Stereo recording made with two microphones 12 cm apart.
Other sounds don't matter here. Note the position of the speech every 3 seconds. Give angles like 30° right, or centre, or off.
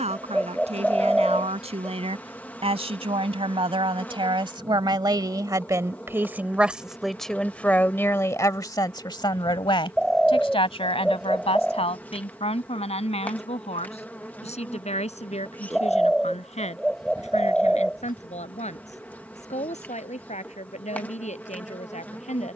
60° right, 40° right, 10° left, 50° left, 70° left, 70° left, 80° left, 80° left.